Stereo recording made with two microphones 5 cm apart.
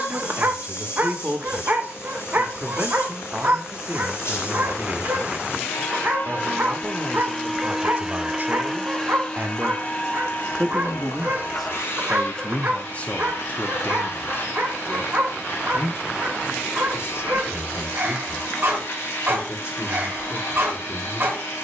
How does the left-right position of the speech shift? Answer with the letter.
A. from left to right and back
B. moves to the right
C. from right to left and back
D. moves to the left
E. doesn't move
D.